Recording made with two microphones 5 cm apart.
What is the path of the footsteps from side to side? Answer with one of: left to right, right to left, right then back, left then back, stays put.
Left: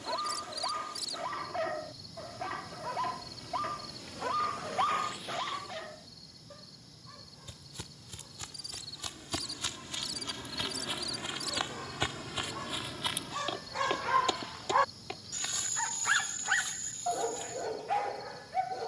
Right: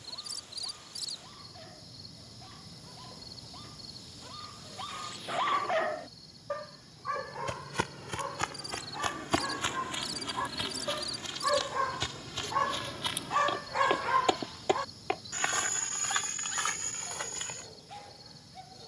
left then back.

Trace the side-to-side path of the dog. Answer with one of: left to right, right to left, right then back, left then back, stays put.
right then back.